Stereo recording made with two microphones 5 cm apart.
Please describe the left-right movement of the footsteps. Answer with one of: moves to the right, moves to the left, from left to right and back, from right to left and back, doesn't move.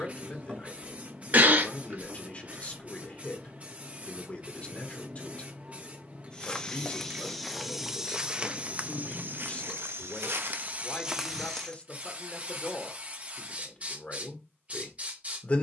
from left to right and back.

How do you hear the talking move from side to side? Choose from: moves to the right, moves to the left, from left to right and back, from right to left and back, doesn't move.
doesn't move.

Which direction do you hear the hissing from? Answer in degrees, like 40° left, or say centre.
30° right.